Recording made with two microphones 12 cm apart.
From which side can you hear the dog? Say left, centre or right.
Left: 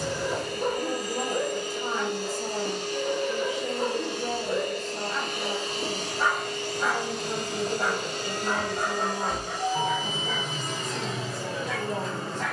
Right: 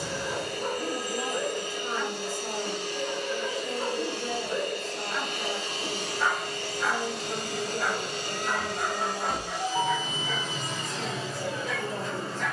left.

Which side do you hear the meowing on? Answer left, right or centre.
left.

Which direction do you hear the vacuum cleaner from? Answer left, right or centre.
left.